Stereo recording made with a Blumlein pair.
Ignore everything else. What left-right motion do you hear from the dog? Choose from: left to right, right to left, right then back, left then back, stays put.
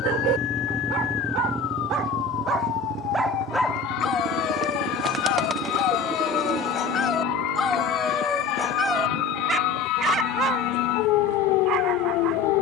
left then back.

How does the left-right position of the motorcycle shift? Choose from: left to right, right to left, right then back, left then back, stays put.
left to right.